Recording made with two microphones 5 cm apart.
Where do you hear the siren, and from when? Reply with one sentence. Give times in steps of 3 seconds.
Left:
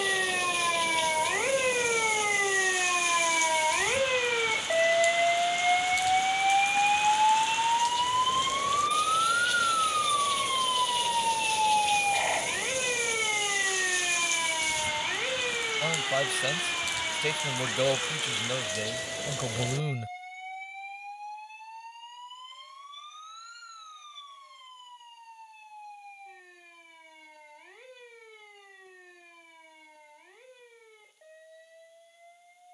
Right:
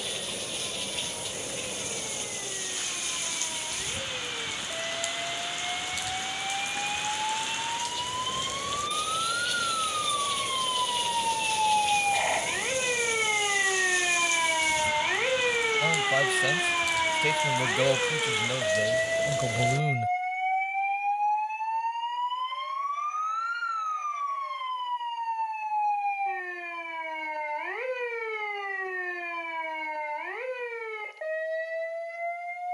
You can hear the siren on the left from 0 s, in the centre from 9 s and on the right from 15 s.